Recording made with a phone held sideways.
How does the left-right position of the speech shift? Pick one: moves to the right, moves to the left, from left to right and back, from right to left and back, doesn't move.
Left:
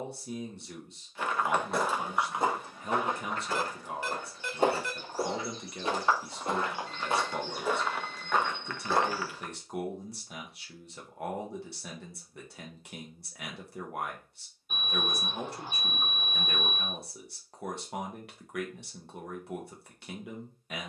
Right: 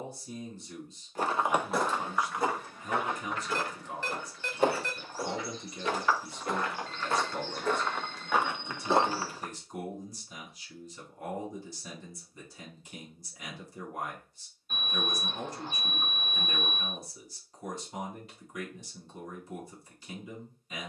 doesn't move.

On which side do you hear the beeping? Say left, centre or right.
centre.